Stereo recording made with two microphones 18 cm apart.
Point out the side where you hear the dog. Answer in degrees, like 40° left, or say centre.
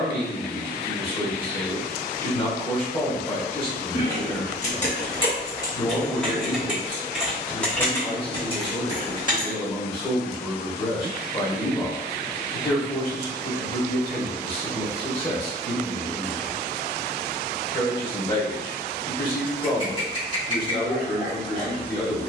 30° left.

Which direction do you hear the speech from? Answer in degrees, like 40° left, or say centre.
30° left.